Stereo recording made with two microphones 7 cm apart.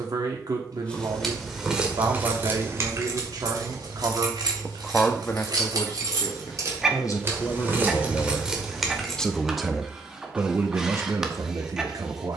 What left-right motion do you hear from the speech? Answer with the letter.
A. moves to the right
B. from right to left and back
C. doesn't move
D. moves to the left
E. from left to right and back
B.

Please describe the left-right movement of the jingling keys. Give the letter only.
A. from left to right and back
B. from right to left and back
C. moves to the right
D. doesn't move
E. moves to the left
A.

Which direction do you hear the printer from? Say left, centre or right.
centre.